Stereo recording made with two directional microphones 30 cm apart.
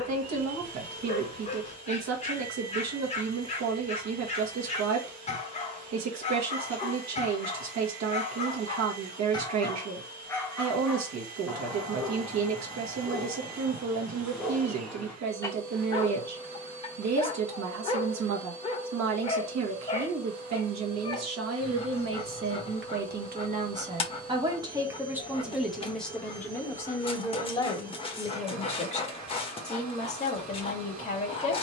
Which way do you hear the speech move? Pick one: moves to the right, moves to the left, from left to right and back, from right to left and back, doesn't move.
moves to the left.